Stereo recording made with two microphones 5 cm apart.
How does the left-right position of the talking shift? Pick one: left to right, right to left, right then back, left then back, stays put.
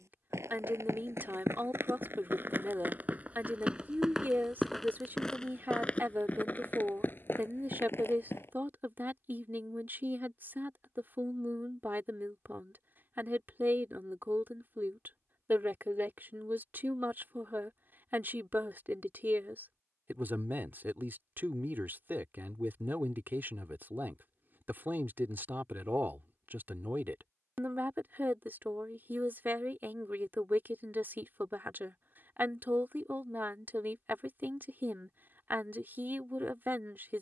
stays put.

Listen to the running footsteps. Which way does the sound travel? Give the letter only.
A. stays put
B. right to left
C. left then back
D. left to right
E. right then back
B.